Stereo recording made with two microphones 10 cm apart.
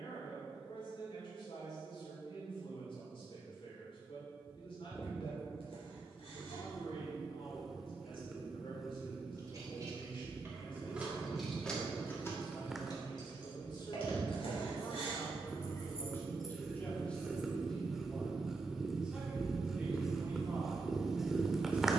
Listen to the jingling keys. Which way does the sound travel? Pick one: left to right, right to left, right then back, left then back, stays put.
left then back.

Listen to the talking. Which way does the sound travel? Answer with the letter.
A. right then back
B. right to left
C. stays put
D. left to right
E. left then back
D.